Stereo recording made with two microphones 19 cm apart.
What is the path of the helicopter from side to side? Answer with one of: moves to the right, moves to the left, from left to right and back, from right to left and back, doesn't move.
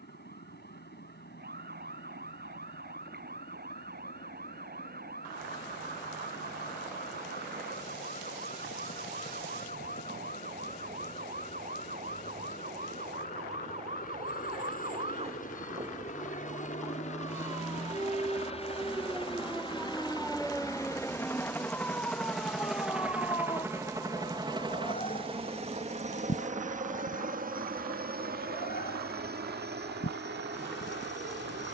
moves to the right.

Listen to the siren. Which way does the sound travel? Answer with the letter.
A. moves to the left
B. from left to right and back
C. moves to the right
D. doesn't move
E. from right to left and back
A.